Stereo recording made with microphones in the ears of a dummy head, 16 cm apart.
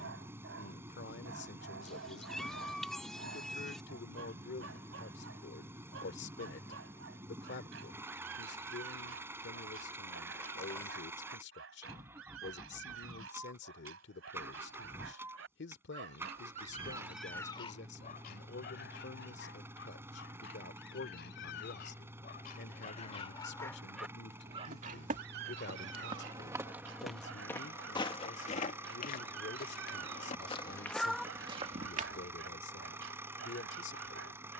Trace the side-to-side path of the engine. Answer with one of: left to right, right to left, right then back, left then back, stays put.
stays put.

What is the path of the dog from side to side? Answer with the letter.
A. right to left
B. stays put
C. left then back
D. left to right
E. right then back
C.